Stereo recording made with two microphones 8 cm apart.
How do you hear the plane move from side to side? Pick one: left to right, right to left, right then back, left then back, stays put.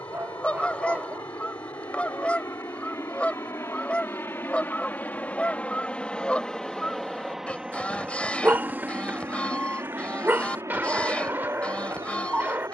left to right.